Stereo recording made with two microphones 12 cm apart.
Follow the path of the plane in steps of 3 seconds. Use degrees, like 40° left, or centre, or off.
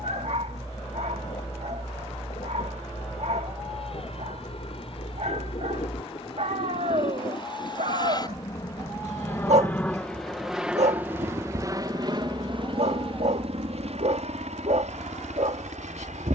70° left, 60° left, 40° left, centre, 50° right, 70° right.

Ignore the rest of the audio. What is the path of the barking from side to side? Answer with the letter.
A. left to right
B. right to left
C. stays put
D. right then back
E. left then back
C.